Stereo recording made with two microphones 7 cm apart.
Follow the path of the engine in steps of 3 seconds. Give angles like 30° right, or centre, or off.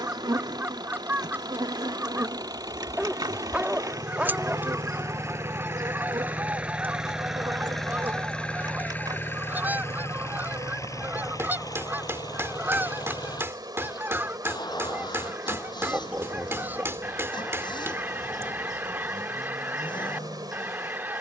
60° right, 40° right, centre, 40° left, 60° left, 70° left, 70° left.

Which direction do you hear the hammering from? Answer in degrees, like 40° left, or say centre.
30° right.